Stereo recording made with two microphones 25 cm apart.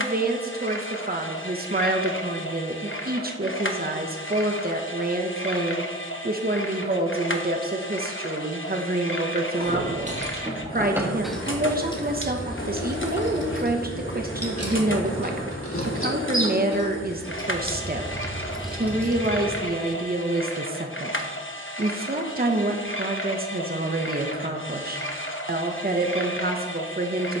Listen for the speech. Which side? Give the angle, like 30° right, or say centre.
40° right.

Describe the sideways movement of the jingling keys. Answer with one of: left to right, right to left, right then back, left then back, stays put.
left then back.